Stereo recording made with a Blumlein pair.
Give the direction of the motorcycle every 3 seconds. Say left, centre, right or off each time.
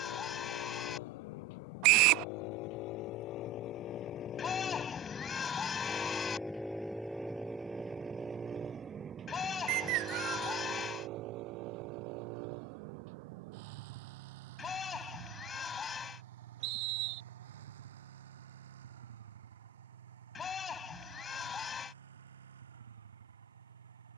left, left, centre, right, right, right, right, right.